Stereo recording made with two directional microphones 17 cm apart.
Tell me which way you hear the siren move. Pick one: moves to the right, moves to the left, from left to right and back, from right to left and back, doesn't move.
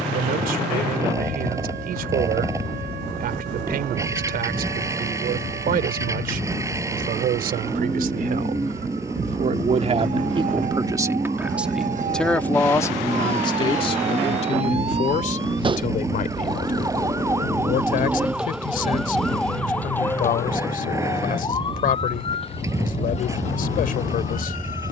moves to the left.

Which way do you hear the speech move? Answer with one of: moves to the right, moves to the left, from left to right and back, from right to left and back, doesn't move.
moves to the left.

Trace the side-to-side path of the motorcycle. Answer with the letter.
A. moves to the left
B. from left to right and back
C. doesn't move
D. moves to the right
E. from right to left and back
C.